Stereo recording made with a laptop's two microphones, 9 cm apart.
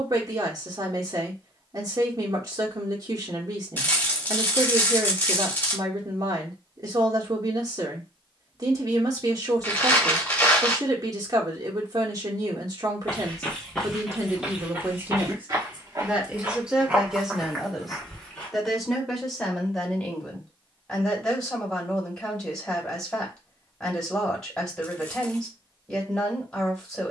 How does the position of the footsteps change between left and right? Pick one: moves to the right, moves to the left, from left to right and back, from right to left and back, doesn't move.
from left to right and back.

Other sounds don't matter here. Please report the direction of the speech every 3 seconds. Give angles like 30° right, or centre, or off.
40° right, 40° right, 40° right, 40° right, 40° right, 10° right, centre, 10° left, 10° left.